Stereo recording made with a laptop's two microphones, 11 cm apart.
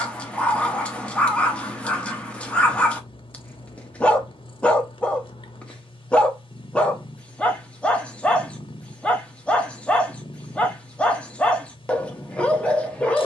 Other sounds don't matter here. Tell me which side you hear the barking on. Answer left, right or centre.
centre.